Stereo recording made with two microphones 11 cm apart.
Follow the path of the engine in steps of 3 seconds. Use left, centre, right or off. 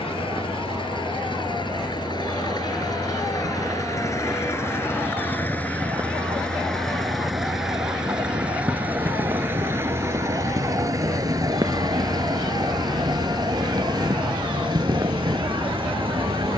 left, left, centre, right, right, right.